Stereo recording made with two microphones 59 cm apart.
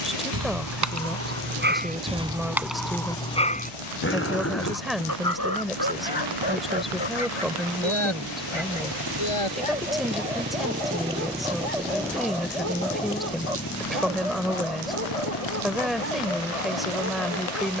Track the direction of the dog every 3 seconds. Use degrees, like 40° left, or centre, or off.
20° right, 20° left, 50° left, 60° left, 70° left, 70° left.